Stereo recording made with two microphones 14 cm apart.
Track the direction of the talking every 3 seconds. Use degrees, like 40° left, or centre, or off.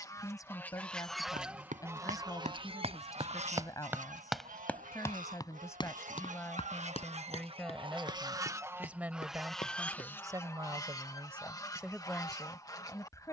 20° left, 20° left, 10° left, 20° right, 10° left.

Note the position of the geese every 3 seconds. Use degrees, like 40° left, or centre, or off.
10° right, 60° right, 40° right, 20° left, 20° left.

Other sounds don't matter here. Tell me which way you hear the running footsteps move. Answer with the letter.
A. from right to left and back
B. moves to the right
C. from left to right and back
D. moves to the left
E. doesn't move
D.